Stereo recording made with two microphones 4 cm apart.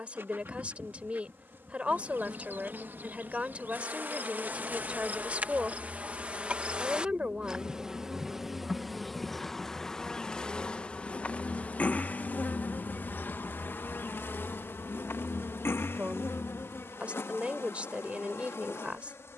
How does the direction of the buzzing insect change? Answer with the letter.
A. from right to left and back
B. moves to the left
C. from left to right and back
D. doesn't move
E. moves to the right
B.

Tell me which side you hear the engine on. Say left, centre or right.
left.